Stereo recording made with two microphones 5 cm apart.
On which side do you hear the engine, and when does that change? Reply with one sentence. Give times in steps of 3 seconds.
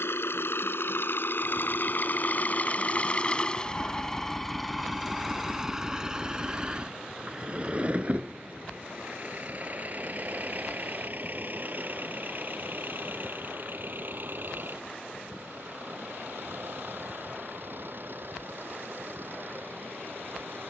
In this clip you hear the engine on the left from 0 s, in the centre from 3 s and on the right from 6 s.